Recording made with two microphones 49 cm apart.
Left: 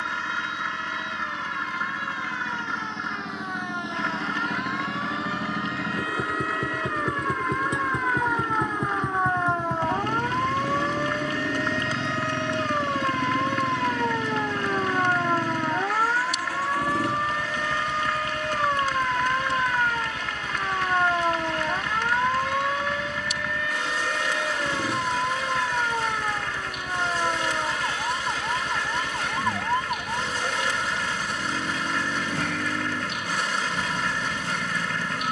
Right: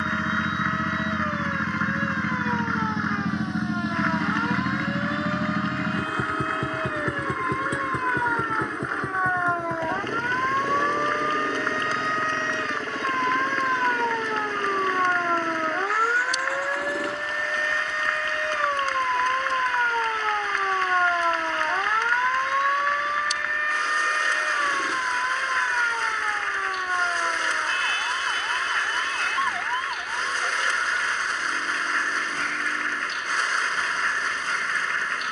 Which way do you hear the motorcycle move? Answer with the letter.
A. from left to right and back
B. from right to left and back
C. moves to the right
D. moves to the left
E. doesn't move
D.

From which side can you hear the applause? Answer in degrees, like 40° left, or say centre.
50° left.